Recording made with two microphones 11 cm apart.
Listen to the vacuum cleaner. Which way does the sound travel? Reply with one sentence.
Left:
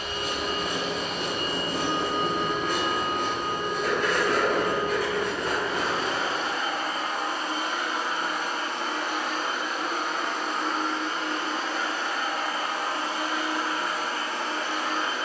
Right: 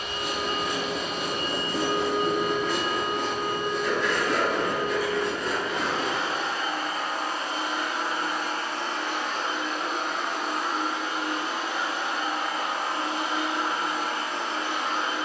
In this clip you hear the vacuum cleaner move to the right.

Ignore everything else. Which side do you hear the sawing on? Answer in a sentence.
In this clip you hear the sawing on the left.